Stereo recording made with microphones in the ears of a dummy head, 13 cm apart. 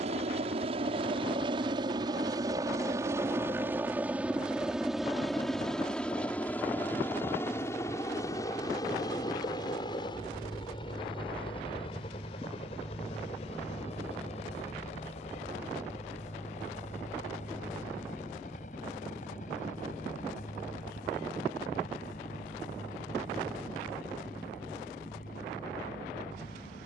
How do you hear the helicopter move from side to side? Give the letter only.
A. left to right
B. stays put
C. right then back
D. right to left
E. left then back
D.